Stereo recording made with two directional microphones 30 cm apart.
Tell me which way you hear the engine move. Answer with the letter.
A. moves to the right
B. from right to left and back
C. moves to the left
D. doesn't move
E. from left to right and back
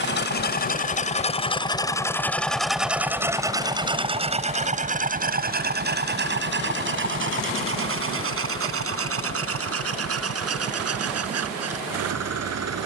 A.